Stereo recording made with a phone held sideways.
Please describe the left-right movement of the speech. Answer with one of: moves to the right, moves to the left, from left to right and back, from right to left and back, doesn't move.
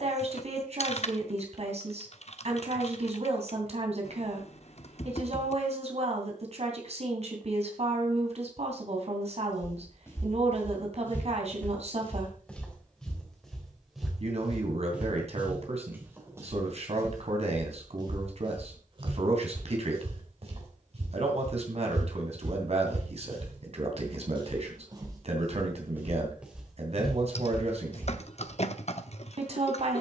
doesn't move.